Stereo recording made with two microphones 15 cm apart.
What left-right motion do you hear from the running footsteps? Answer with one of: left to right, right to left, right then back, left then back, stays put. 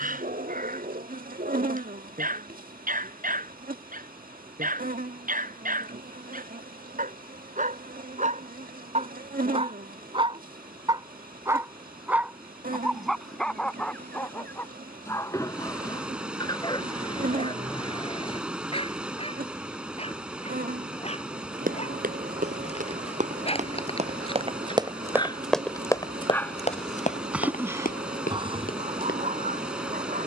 right to left.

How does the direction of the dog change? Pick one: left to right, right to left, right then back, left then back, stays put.
left then back.